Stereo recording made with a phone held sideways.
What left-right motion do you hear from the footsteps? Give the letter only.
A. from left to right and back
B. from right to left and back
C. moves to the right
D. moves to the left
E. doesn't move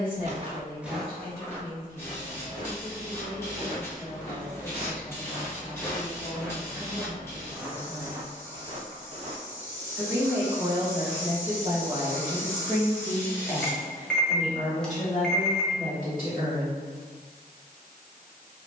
B.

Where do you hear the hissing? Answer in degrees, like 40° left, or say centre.
20° left.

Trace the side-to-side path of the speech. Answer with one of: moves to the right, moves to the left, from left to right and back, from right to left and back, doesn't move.
from left to right and back.